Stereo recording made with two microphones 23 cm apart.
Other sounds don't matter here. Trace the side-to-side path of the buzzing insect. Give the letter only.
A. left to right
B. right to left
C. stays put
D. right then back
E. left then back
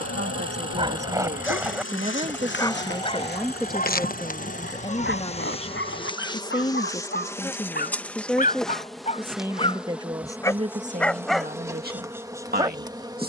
A.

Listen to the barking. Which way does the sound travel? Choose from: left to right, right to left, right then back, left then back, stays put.
left then back.